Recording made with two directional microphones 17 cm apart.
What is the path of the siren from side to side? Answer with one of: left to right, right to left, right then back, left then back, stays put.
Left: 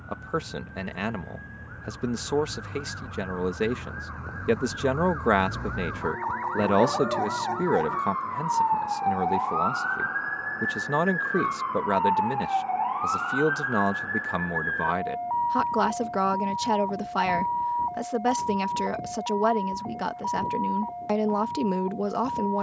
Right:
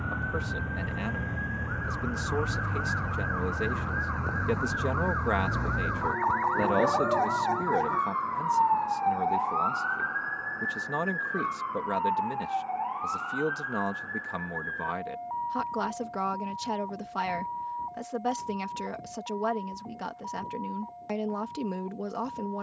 right to left.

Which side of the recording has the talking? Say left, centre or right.
left.